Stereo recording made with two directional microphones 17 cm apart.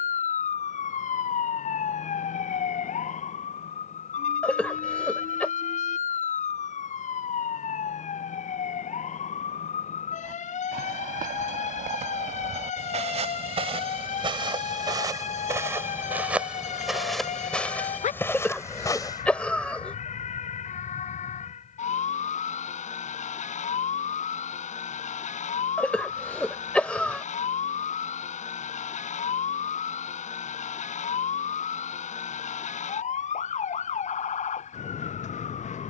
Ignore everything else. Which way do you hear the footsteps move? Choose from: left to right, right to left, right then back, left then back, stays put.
right to left.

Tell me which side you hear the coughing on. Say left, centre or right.
centre.